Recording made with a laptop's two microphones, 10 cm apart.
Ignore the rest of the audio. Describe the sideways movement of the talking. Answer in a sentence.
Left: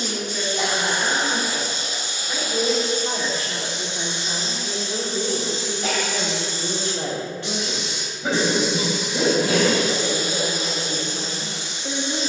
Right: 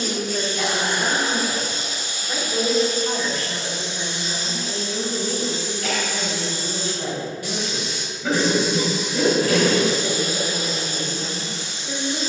You can hear the talking go from the right side to the left.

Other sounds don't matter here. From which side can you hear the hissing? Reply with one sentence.
You can hear the hissing on the left.